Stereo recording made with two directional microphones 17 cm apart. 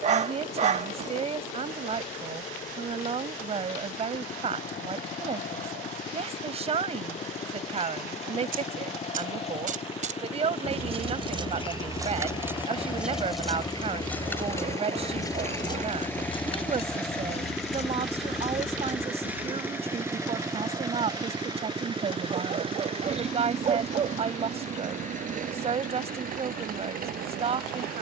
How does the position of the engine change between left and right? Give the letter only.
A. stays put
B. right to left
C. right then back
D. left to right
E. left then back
D.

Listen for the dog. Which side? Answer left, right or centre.
right.